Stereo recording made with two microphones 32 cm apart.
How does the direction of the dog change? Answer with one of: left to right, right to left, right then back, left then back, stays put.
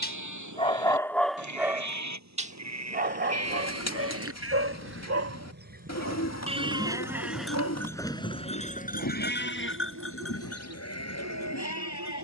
left to right.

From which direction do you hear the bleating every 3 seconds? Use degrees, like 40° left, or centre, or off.
60° right, 40° right, centre, 50° left.